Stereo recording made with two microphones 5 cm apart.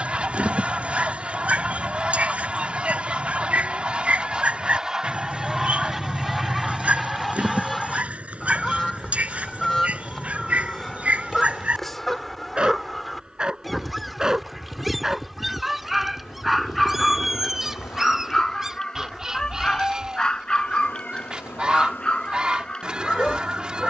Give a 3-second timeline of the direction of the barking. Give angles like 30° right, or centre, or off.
30° right, 30° right, 30° right, 30° right, 20° right, centre, 10° left, 20° left.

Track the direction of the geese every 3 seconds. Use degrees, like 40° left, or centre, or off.
20° right, 20° right, centre, 10° left, centre, 10° right, 10° right, 20° right.